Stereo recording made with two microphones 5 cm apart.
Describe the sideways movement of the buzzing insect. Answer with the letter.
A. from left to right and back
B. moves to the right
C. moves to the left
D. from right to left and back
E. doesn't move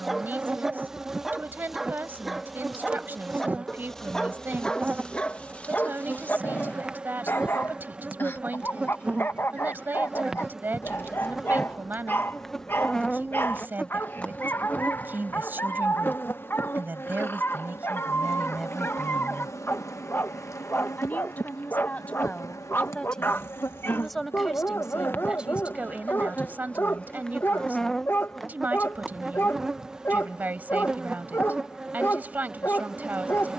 D.